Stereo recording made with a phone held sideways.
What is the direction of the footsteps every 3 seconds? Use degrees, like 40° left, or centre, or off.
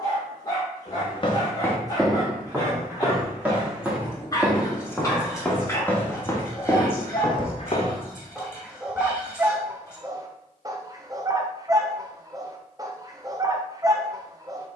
10° left, centre, 30° left, off, off.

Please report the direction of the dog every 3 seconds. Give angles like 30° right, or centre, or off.
30° left, 20° left, 10° left, 20° right, 20° right.